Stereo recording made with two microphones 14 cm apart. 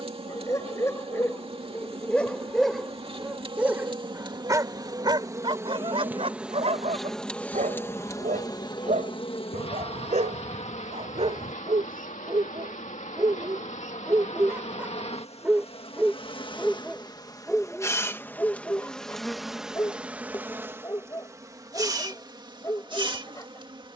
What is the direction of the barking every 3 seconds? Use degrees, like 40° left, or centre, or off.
10° left, 20° right, 60° right, 50° right, 30° right, centre, 20° left, 20° left.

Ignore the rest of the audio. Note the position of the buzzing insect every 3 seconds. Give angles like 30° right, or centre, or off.
40° right, 30° right, 10° left, 50° left, 60° left, 40° left, centre, 30° right.